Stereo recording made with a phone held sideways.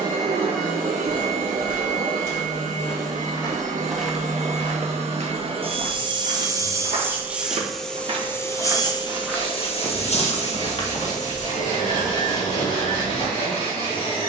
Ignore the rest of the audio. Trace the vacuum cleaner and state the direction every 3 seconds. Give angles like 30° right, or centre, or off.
70° right, 50° right, centre, 50° left, 70° left.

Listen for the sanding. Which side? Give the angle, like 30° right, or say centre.
40° left.